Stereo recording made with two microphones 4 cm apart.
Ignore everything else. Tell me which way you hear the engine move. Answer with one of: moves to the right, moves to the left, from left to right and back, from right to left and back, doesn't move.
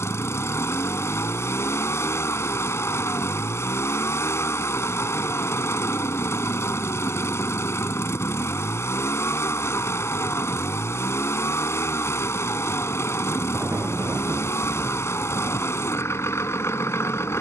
doesn't move.